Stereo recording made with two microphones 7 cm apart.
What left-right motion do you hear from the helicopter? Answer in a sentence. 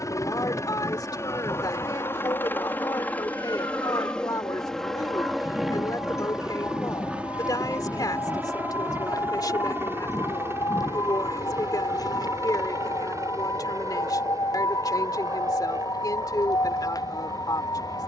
You can hear the helicopter go from the left side to the right.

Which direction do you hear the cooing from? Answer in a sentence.
In this clip you hear the cooing on the left.